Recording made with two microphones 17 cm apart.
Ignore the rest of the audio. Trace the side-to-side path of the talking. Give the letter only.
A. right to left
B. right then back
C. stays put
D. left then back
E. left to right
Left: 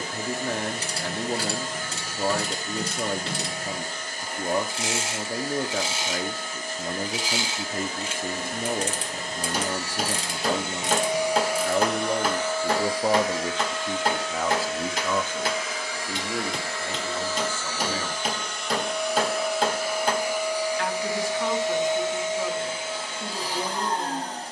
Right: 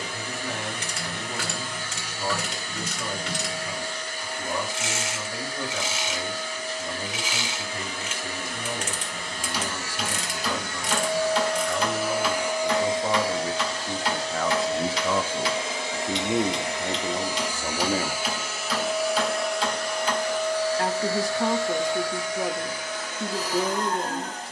E.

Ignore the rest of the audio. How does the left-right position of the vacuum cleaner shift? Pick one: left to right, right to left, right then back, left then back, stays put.
right then back.